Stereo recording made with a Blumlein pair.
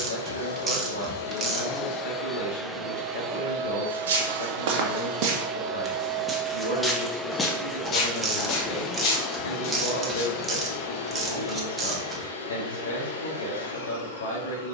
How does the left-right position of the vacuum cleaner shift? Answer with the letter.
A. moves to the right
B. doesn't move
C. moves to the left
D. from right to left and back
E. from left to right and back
E.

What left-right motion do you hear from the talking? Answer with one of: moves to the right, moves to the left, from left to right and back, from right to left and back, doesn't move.
doesn't move.